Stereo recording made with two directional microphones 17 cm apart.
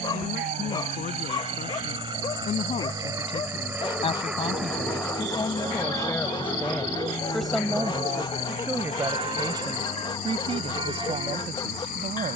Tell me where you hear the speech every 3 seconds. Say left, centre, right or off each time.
left, left, centre, right.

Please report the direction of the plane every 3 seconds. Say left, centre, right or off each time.
right, centre, left, left.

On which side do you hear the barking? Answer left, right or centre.
left.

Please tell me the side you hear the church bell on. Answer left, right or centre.
right.